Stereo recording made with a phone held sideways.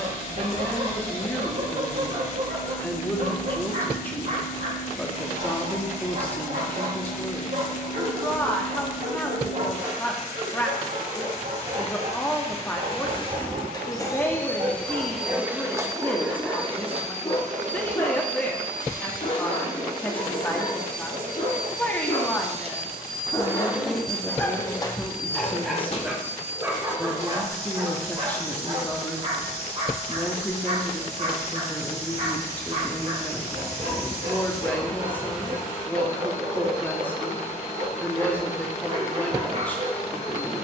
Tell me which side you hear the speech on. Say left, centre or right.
centre.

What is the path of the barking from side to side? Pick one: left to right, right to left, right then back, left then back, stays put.
left then back.